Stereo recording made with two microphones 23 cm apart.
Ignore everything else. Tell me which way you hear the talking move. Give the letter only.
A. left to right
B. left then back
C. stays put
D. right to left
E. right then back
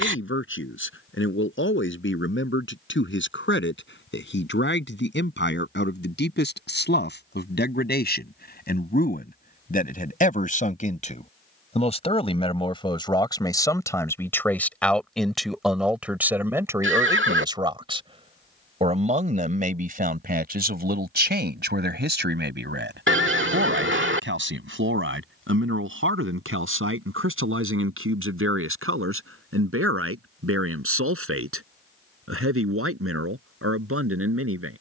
A.